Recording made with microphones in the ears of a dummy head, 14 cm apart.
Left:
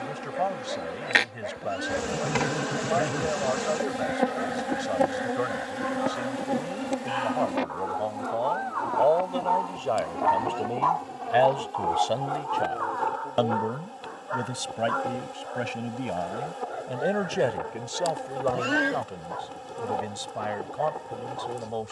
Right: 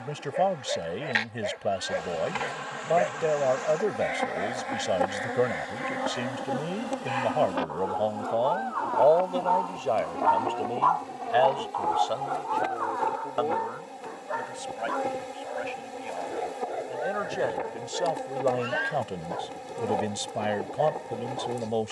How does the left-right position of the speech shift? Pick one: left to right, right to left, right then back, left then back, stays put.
left then back.